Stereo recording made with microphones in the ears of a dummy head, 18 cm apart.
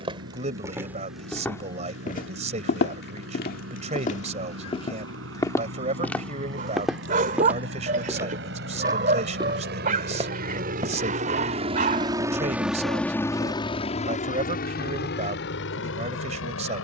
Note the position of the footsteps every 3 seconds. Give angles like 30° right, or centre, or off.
10° left, 30° left, 10° right, 20° right, off, off.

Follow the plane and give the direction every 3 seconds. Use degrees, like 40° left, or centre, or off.
80° right, 80° right, 70° right, 50° right, 20° left, 60° left.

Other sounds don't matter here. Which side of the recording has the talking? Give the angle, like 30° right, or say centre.
30° right.